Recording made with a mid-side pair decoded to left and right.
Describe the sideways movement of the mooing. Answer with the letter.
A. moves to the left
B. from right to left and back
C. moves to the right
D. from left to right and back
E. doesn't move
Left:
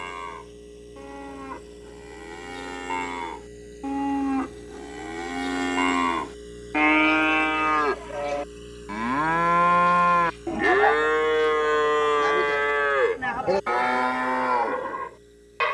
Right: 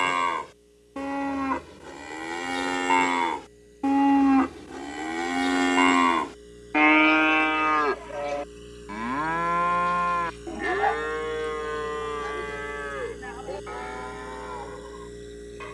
A.